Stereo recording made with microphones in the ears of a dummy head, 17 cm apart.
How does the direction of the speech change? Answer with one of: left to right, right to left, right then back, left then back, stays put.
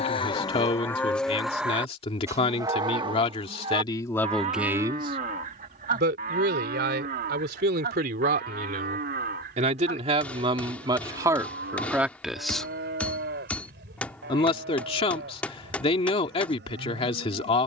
right then back.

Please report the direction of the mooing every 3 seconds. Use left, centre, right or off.
centre, right, right, right, right, right.